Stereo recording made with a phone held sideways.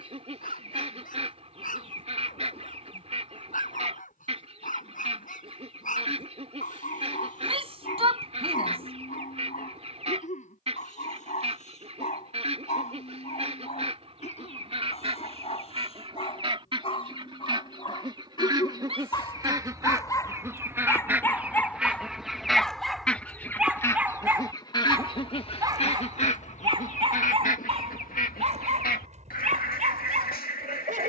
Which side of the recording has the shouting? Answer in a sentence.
In this clip you hear the shouting on the right.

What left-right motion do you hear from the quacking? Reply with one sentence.
You can hear the quacking travel towards the left.